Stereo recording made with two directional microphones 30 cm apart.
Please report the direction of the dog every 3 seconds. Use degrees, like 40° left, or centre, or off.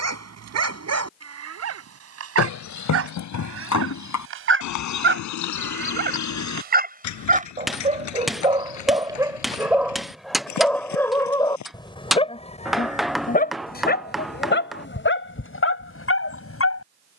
60° right, 40° right, 20° right, centre, 30° left, 40° left.